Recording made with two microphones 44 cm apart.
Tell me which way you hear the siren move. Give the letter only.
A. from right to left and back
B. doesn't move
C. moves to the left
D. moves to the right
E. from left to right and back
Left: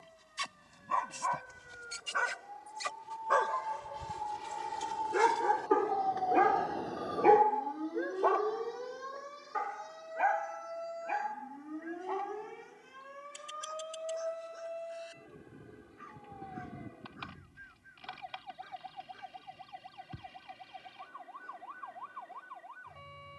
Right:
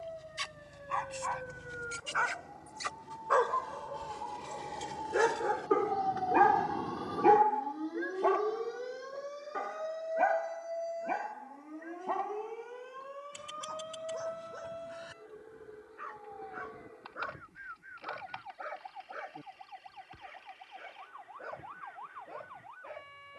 C.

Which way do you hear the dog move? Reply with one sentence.
In this clip you hear the dog travel towards the right.